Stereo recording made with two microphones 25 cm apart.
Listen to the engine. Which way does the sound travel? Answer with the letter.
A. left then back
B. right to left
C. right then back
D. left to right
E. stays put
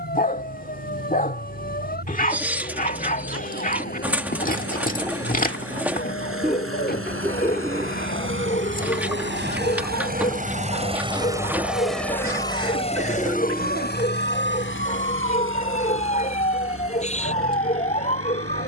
B.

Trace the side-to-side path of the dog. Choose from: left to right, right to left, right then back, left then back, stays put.
stays put.